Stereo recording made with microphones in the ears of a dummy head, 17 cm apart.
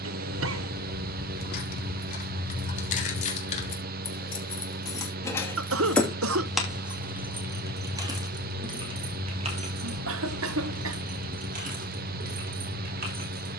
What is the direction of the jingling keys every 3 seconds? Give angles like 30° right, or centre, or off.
50° left, 20° left, 20° right, 40° right, 50° right.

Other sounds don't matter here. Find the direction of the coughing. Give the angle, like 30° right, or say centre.
80° right.